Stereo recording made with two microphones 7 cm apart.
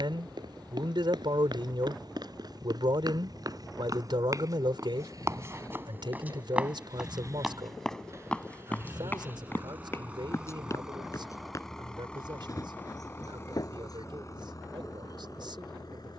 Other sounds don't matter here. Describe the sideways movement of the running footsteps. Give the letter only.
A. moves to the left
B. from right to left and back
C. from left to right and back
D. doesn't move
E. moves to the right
A.